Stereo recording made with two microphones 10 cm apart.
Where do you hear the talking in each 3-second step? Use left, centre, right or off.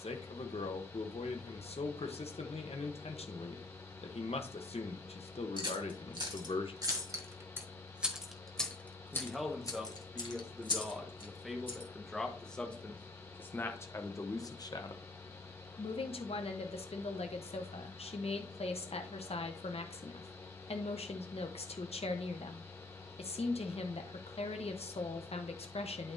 left, left, left, centre, left, left, left, left, left.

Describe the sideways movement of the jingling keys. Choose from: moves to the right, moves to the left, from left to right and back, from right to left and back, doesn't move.
moves to the left.